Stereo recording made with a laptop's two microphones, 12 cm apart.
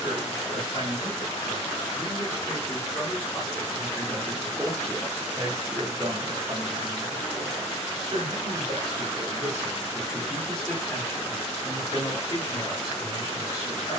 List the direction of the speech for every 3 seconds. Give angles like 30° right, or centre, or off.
40° left, centre, 50° right, centre, 30° left.